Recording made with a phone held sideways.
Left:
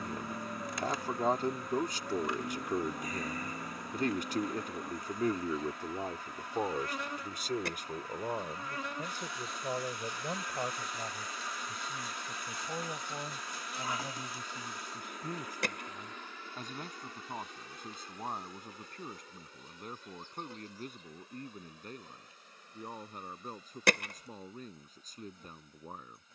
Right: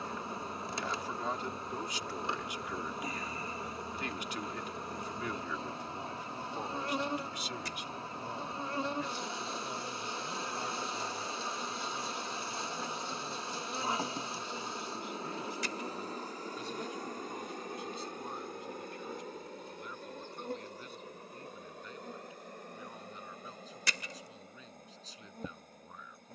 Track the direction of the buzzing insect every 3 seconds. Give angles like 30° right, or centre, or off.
30° right, 30° right, 30° right, 30° right, 30° right, 40° right, 50° right, 60° right, 60° right.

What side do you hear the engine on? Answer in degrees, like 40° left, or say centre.
60° left.